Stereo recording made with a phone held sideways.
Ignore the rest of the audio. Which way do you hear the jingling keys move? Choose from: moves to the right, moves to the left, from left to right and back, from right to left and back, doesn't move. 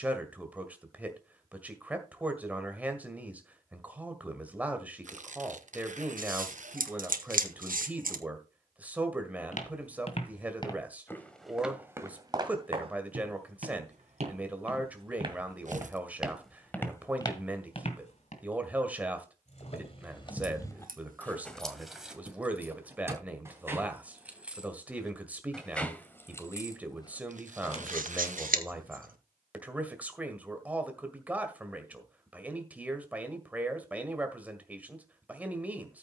from left to right and back.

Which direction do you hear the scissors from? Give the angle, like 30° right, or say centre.
70° right.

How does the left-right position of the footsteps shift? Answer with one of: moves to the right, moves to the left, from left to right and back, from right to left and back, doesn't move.
from left to right and back.